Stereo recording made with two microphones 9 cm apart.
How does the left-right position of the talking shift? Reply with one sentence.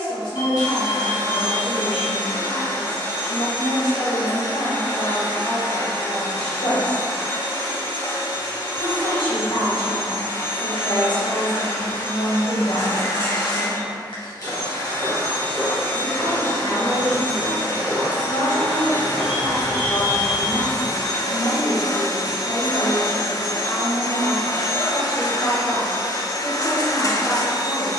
You can hear the talking stay in one place.